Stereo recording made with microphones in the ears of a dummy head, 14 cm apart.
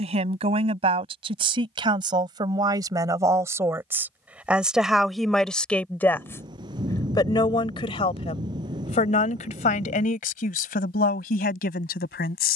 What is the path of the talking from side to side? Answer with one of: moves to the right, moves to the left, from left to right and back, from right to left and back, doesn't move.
moves to the left.